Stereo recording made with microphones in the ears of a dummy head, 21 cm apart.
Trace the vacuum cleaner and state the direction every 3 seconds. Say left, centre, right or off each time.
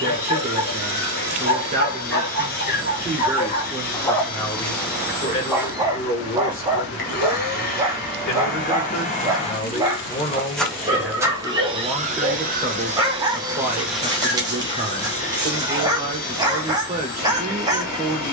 left, left, left, centre, centre, left.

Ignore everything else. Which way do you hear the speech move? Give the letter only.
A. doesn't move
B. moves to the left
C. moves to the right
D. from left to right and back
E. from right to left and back
E.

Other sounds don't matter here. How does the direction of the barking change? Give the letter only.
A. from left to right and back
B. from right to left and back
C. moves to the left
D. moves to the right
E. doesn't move
D.